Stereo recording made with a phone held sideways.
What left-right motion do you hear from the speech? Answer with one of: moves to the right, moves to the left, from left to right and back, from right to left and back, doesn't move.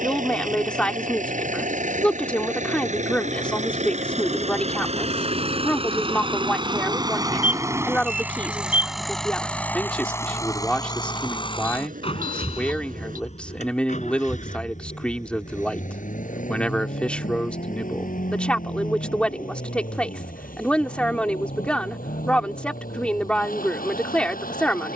doesn't move.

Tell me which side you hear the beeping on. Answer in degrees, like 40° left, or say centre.
70° right.